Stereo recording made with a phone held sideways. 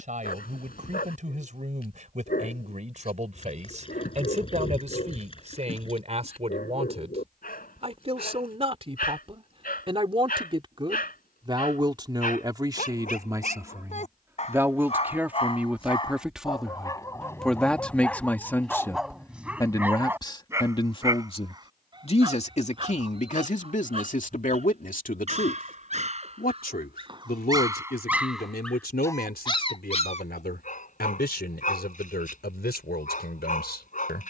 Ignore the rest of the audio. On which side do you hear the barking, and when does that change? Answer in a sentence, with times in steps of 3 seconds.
In this clip you hear the barking on the left from 0 s, in the centre from 18 s, on the right from 21 s, in the centre from 27 s and on the left from 30 s.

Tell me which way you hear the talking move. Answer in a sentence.
You can hear the talking travel towards the left.